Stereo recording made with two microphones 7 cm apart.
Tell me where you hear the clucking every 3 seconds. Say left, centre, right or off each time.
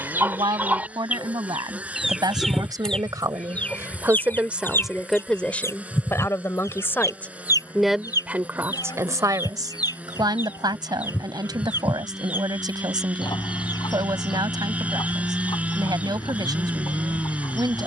centre, left, left, left, left, left.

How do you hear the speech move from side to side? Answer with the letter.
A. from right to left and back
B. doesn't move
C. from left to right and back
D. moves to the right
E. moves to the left
A.